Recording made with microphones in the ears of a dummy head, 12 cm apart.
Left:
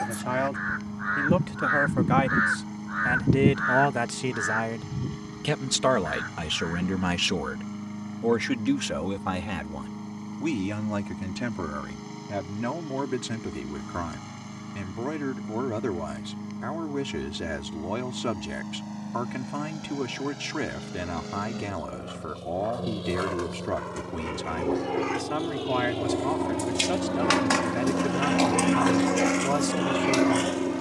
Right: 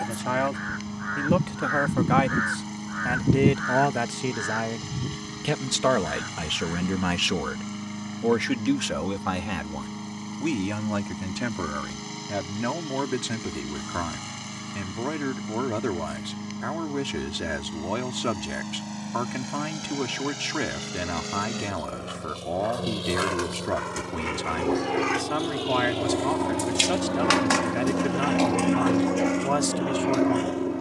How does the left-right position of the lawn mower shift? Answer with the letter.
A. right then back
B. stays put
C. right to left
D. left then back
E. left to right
C.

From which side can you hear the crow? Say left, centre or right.
left.